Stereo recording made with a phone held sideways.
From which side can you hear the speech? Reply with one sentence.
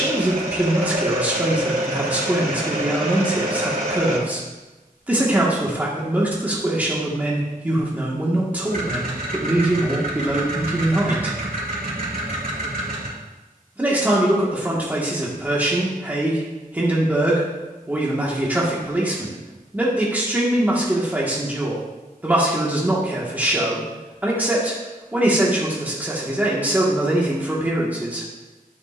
You can hear the speech in the centre.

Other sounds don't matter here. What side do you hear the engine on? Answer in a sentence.
In this clip you hear the engine on the right.